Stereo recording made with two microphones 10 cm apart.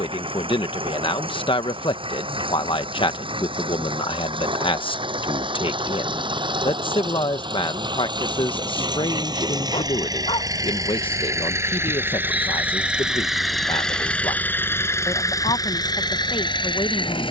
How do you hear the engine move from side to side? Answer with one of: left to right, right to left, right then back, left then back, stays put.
right to left.